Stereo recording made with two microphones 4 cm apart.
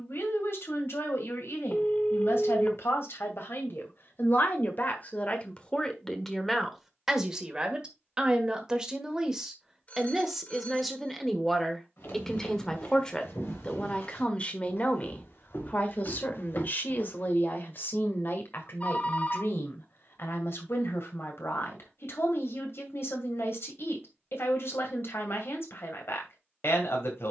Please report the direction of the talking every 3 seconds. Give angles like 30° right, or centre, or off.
70° left, 40° left, 10° right, 10° right, 20° left, 40° left, 60° left, 70° left, 70° left.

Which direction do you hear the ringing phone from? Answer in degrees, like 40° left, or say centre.
30° left.